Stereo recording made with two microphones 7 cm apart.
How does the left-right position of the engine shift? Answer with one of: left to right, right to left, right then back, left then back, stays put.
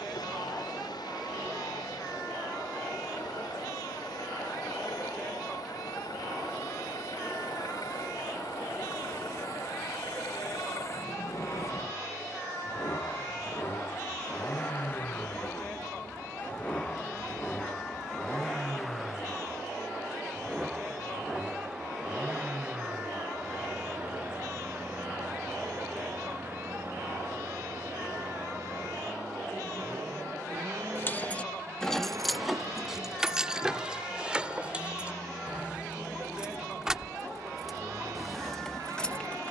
left to right.